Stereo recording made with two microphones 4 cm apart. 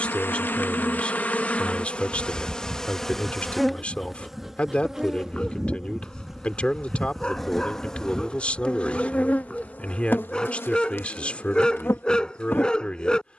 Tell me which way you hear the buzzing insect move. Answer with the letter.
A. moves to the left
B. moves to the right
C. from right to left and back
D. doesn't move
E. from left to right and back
E.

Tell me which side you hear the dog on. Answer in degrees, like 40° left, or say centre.
20° left.